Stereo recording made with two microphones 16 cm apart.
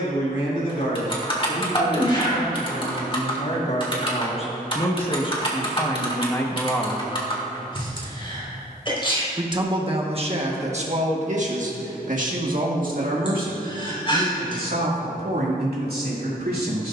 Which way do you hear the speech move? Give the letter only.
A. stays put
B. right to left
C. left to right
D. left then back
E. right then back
C.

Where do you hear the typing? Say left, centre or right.
left.